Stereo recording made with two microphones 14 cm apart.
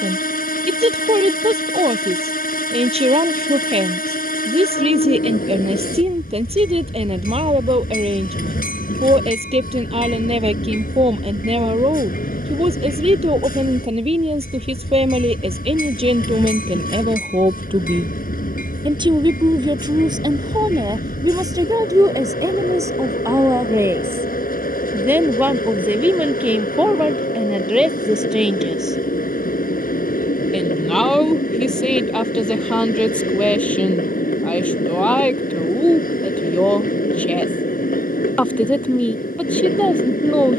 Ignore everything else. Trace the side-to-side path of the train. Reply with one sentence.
You can hear the train stay in one place.